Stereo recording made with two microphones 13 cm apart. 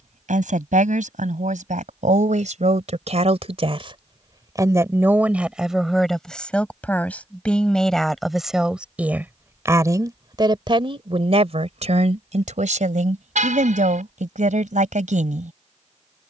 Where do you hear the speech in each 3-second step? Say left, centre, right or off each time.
right, right, centre, right, right, right.